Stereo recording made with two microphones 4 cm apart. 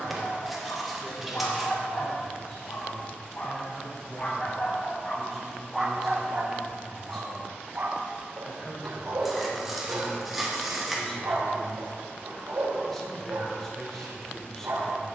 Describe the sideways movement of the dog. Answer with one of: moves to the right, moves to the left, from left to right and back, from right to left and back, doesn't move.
moves to the right.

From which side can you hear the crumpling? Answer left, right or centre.
centre.